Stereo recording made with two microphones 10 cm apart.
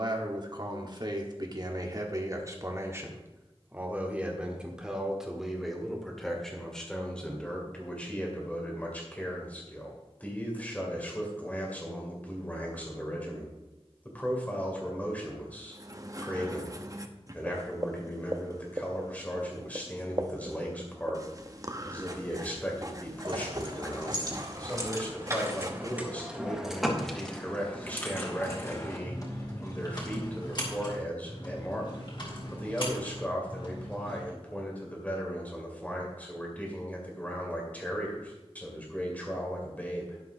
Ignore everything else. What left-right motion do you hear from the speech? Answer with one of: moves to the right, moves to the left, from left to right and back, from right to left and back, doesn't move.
moves to the left.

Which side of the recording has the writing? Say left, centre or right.
right.